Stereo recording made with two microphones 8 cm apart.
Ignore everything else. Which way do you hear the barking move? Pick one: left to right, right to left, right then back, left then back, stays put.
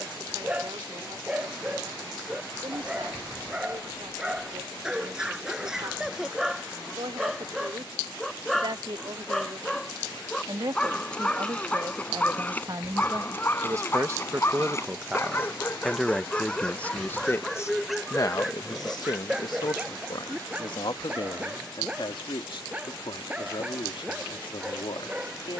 left then back.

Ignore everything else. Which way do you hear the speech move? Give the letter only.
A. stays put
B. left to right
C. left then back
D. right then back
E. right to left
E.